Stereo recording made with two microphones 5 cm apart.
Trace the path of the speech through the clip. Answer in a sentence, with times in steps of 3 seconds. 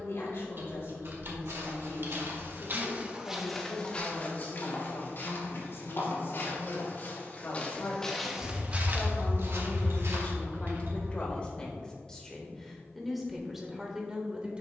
You can hear the speech on the left from 0 s and in the centre from 12 s.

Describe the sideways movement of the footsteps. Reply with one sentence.
In this clip you hear the footsteps move from right to left and back again.